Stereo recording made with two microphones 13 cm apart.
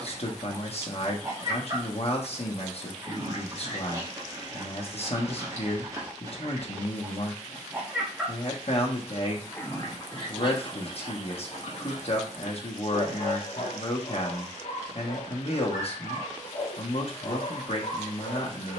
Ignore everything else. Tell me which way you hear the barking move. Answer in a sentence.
You can hear the barking move from right to left.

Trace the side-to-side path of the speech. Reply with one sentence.
In this clip you hear the speech stay in one place.